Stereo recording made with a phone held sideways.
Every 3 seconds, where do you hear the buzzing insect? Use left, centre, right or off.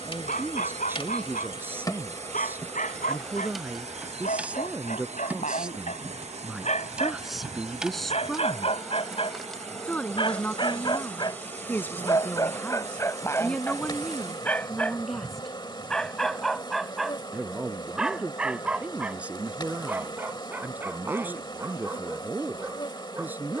left, centre, centre, centre, left, left, left, left.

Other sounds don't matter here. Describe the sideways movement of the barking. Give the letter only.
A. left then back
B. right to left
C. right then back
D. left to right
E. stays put
D.